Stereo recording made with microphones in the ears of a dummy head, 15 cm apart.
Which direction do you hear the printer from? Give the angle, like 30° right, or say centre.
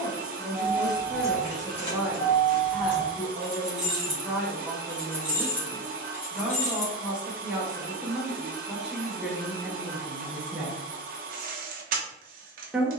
50° right.